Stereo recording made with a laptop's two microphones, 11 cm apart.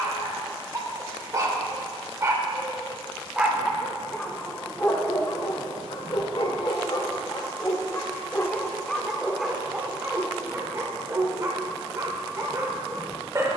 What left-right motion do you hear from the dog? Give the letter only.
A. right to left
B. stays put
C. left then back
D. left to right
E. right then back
C.